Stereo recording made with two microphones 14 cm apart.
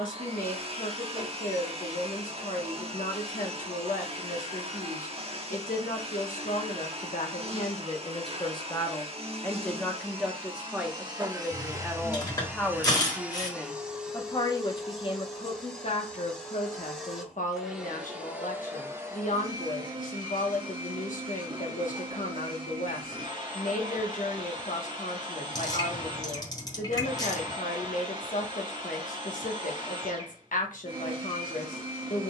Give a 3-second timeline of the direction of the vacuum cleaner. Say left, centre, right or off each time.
right, right, right, right, centre, centre, right, right, right, right, right.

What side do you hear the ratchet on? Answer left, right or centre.
left.